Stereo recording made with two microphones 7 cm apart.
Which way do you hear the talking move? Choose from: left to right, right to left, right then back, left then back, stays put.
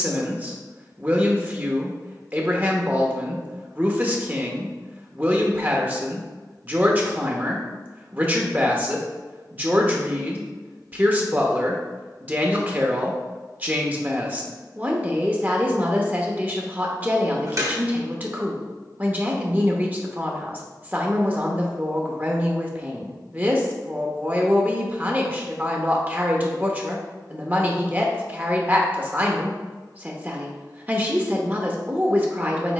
stays put.